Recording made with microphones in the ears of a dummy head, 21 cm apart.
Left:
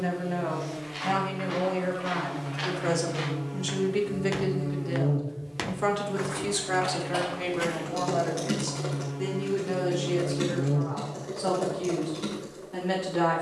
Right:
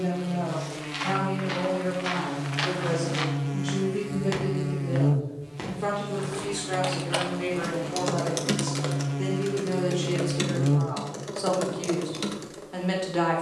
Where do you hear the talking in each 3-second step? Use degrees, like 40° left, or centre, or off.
60° left, 40° left, 20° left, 20° right, 20° right.